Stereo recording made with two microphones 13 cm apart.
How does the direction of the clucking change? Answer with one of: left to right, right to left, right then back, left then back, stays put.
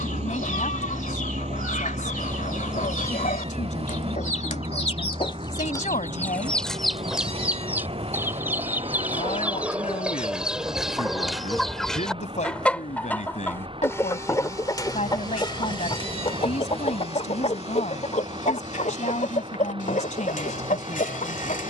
right then back.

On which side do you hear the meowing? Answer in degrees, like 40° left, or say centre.
50° right.